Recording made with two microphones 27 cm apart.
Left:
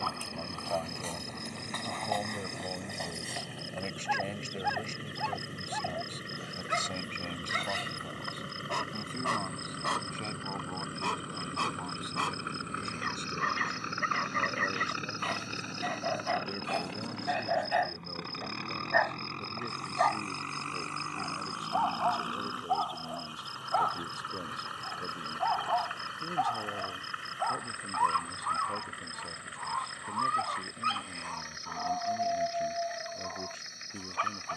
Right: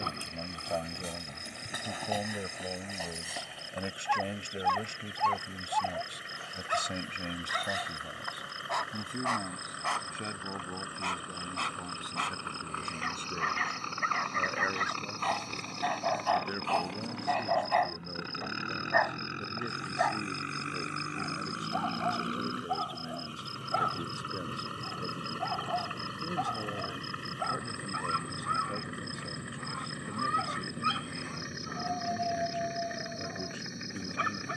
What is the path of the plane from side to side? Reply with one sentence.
In this clip you hear the plane travel towards the right.